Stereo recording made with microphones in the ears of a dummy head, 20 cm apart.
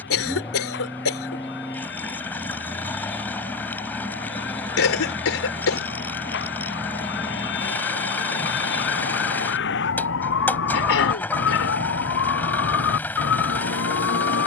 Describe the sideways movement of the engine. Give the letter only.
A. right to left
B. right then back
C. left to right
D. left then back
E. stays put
E.